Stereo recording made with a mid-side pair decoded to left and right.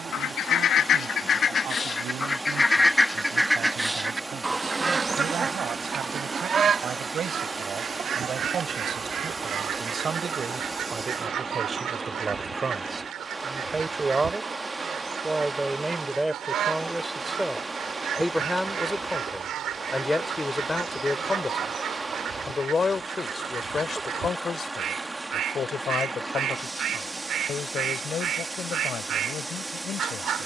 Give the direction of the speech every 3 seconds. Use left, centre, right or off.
right, right, right, right, right, centre, centre, left, left, left.